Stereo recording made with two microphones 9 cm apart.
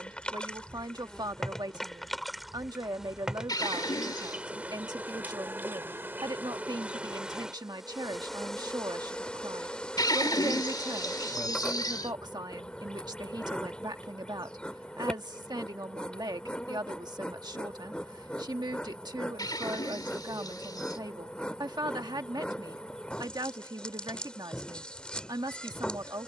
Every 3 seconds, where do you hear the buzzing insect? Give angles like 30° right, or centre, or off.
10° left, 20° right, 10° right, 10° left, 10° left, 10° left, 10° left, 10° left, 10° left.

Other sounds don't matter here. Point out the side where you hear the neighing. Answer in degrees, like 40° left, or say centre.
50° left.